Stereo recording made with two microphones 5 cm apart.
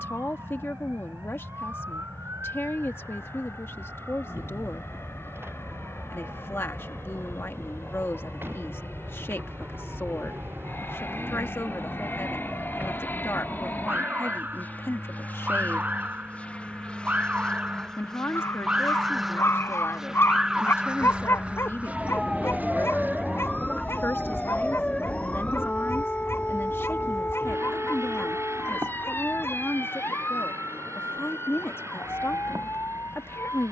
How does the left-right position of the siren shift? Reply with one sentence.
You can hear the siren move to the left.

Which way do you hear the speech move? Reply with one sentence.
In this clip you hear the speech stay in one place.